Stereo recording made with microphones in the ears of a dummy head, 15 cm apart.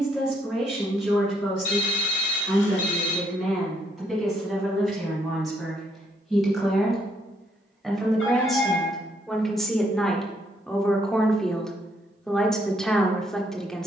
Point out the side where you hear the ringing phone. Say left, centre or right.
left.